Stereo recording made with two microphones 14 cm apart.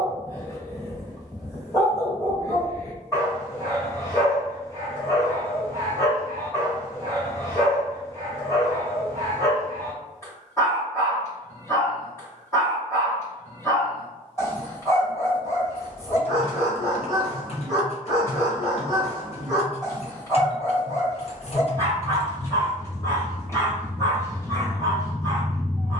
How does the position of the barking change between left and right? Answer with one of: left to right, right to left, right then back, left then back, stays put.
stays put.